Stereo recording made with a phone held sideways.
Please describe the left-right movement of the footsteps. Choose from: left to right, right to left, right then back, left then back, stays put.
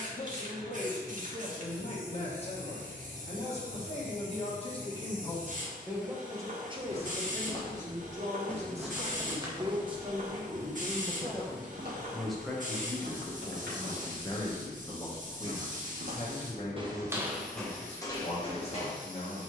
right then back.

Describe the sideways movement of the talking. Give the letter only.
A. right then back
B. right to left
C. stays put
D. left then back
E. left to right
A.